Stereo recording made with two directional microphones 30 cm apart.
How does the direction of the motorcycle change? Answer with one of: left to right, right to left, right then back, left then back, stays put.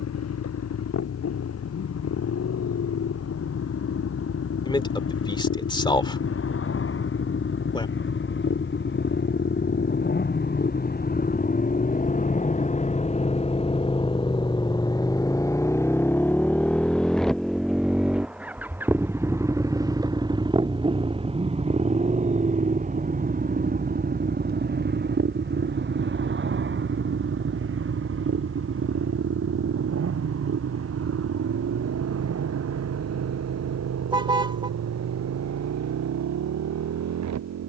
left to right.